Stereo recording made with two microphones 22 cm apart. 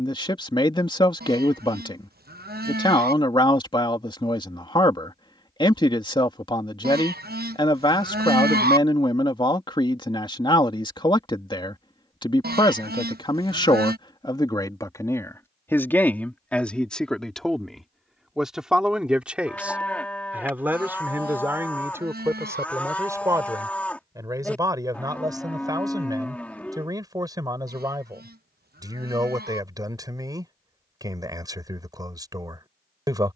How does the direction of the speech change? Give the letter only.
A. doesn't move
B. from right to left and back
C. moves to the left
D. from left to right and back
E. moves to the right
E.